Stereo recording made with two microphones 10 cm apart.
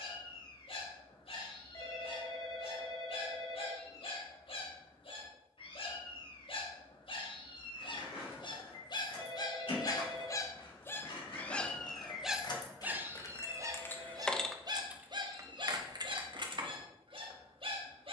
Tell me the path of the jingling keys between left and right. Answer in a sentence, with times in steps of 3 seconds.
In this clip you hear the jingling keys not at all from 0 s, on the left from 6 s and on the right from 15 s.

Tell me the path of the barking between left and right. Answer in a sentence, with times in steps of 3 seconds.
You can hear the barking on the left from 0 s and on the right from 12 s.